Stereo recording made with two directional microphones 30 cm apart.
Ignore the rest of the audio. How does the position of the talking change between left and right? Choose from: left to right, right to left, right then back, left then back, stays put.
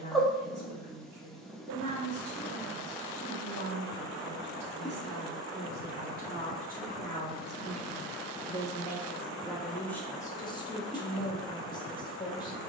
right to left.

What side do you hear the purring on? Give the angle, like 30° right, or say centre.
centre.